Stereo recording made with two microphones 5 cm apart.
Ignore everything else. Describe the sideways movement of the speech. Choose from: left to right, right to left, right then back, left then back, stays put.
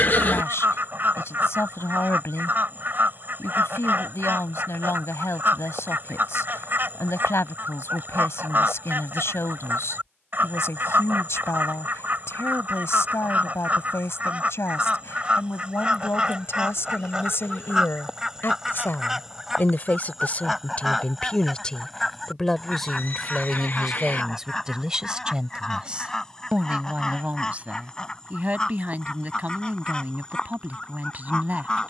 left to right.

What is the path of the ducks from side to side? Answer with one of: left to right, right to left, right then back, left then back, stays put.
right to left.